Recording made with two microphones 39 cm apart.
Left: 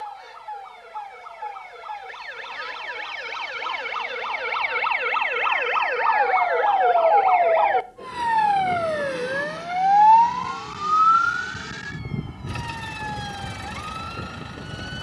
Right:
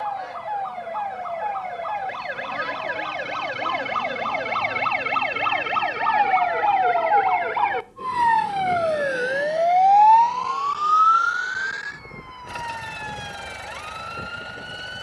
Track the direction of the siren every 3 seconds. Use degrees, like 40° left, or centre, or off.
80° right, 60° right, 20° right, 30° left, 50° left.